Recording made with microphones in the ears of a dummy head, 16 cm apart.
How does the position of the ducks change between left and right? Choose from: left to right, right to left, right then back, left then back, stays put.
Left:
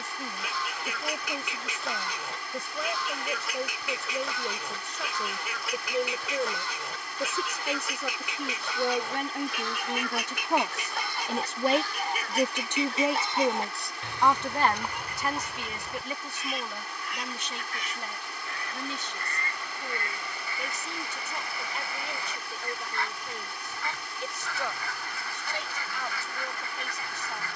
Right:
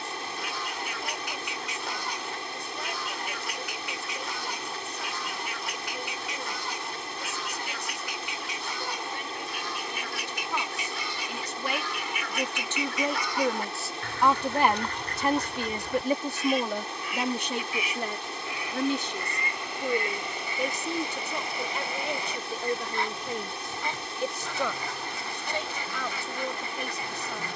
left to right.